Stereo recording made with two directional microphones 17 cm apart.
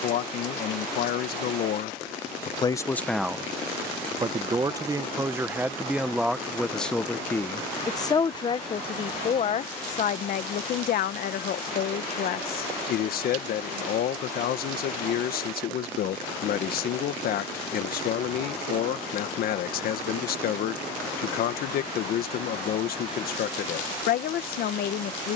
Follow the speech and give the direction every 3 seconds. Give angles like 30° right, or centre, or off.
50° left, 10° right, 10° left, 50° left, 60° left, 60° left, 60° left, 60° left, 60° left.